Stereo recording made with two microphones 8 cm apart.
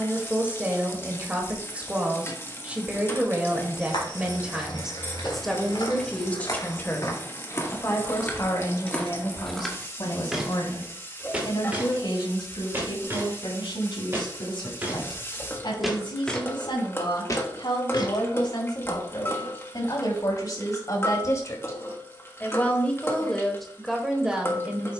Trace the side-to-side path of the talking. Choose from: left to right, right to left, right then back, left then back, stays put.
left then back.